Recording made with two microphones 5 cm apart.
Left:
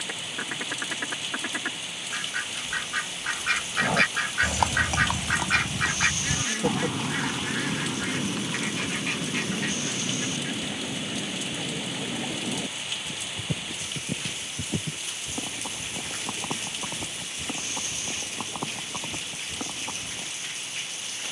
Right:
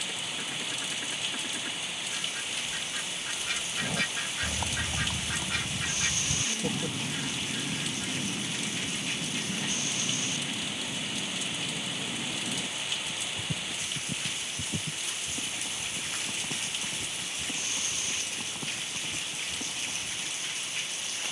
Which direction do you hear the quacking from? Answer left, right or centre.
left.